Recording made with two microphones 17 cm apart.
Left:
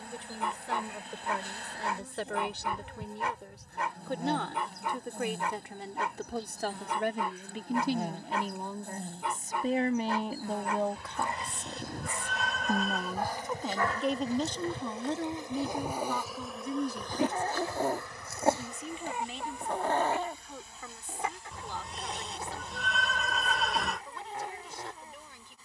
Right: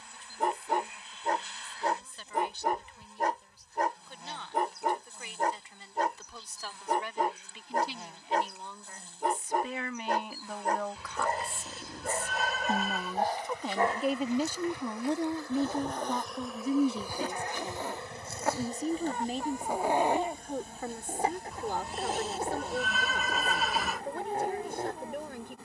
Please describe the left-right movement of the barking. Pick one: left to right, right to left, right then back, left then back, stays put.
left then back.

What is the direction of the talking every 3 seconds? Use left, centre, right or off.
left, left, left, left, centre, right, right, right, right.